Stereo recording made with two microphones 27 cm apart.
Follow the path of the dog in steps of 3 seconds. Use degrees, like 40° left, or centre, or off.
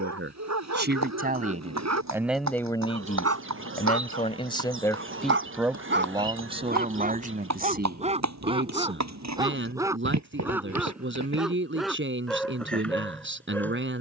80° right, 50° right, 30° right, 10° right, centre.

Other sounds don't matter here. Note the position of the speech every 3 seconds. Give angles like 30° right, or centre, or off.
20° right, 20° left, 30° right, 50° right, 50° right.